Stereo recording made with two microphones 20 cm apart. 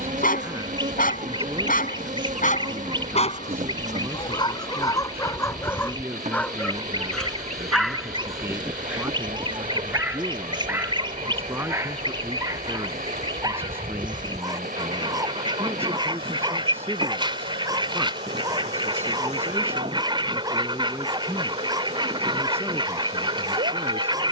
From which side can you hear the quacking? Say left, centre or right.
right.